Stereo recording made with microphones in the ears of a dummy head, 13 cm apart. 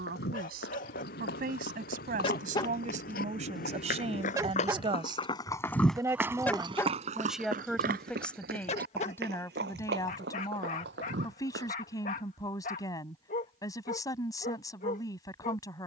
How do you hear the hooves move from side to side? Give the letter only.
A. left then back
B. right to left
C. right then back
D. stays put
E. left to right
E.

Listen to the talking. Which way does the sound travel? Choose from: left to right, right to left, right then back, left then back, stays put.
right to left.